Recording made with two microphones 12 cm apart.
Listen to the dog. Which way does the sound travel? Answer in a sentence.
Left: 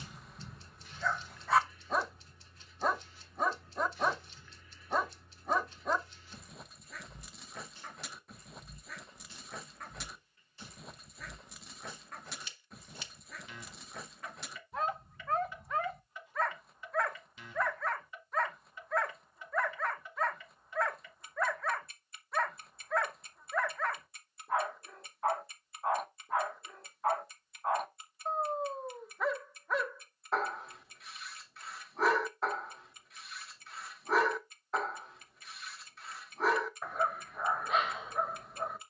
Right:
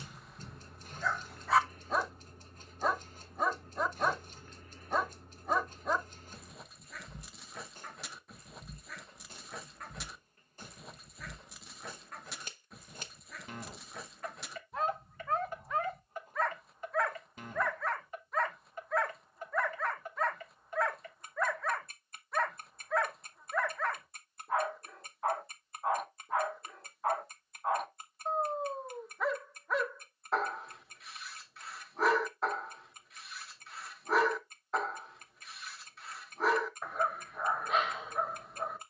You can hear the dog stay put.